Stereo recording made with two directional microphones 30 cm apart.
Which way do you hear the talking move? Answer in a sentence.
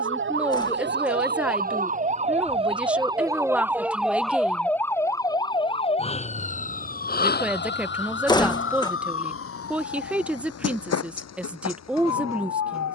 In this clip you hear the talking stay in one place.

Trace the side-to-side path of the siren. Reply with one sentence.
You can hear the siren move from right to left.